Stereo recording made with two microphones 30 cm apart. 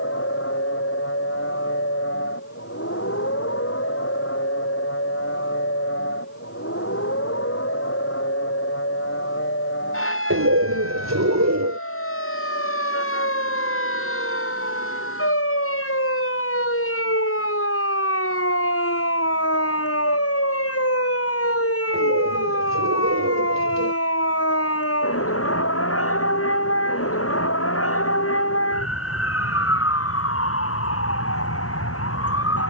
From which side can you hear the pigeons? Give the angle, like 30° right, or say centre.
60° right.